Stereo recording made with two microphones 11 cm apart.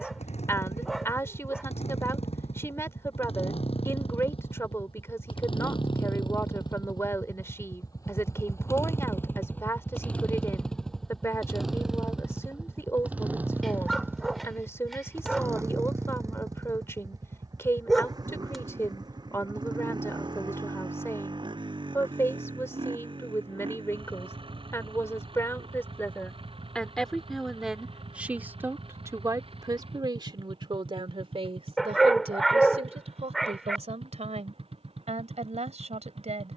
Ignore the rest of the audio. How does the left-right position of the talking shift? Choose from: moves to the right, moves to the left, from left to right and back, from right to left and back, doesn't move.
moves to the right.